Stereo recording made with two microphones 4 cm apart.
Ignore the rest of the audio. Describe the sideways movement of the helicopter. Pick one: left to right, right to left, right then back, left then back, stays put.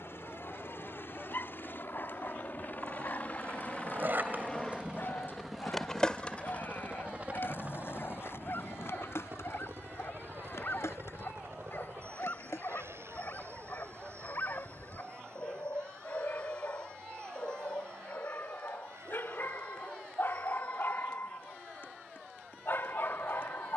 left to right.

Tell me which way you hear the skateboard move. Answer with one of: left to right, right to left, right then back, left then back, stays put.
right to left.